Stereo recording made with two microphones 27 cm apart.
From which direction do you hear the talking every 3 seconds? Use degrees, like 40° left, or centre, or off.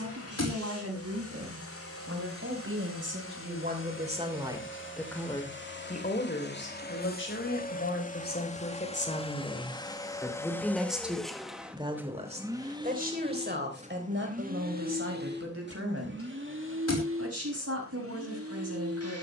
60° right, 20° right, 40° left, 10° left, 40° right, 60° right, 60° right.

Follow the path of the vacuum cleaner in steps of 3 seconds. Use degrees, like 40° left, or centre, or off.
60° left, 50° left, 30° left, 10° left, 20° right, 50° right, 60° right.